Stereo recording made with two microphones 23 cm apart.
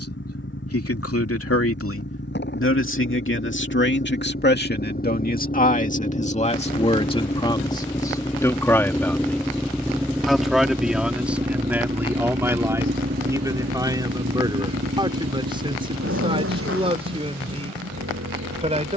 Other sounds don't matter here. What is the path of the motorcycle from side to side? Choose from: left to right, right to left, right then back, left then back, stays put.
left to right.